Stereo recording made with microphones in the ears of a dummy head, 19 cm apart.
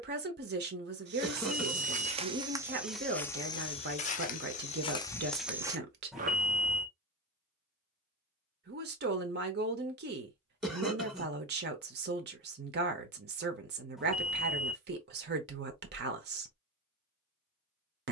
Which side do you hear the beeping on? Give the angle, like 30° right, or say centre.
centre.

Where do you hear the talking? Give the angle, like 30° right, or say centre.
50° right.